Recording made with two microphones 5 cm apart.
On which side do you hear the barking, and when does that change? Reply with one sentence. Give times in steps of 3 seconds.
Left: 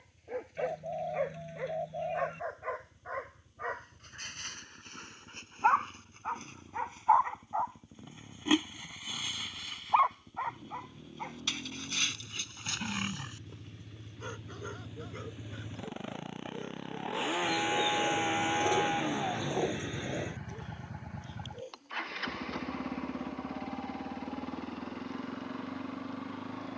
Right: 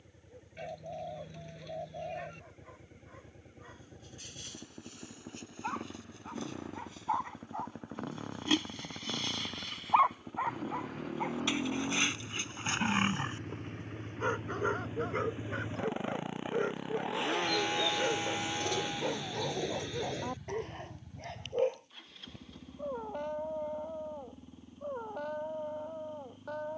In this clip you hear the barking on the left from 0 s, in the centre from 9 s and on the right from 12 s.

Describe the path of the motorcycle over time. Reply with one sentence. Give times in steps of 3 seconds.
You can hear the motorcycle on the right from 0 s, in the centre from 15 s and on the left from 18 s.